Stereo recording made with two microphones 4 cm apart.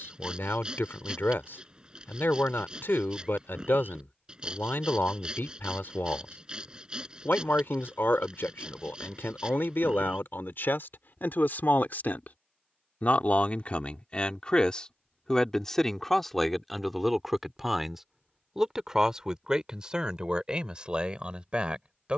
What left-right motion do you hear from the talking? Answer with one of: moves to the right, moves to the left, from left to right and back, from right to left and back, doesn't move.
moves to the right.